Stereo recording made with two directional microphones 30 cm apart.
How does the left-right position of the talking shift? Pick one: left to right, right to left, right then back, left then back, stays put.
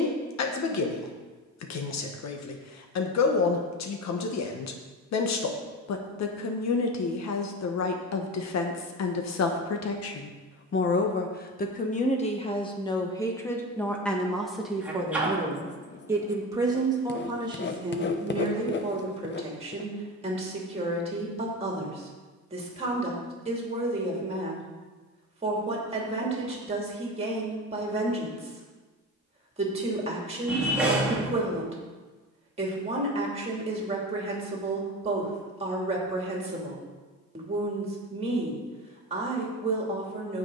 left to right.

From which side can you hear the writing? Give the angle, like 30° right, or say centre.
40° left.